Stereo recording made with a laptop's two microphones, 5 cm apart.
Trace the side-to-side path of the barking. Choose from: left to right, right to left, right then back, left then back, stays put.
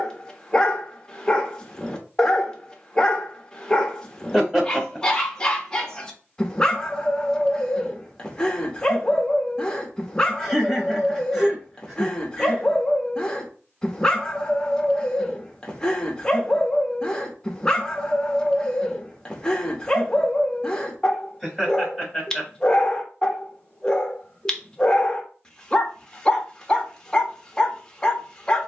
stays put.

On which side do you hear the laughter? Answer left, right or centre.
centre.